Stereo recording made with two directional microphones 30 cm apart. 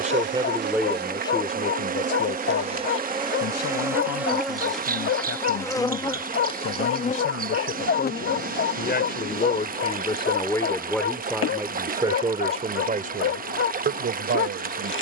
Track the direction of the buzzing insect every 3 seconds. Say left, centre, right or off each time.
right, centre, left, left, left.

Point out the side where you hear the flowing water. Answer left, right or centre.
right.